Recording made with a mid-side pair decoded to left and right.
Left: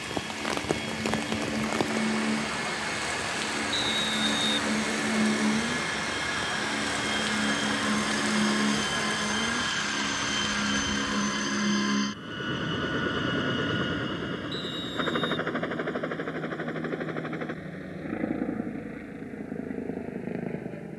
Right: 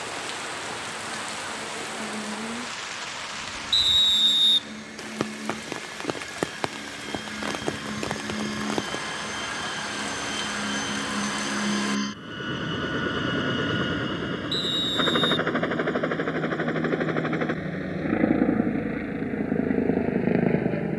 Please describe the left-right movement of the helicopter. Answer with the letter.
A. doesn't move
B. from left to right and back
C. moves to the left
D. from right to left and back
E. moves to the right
E.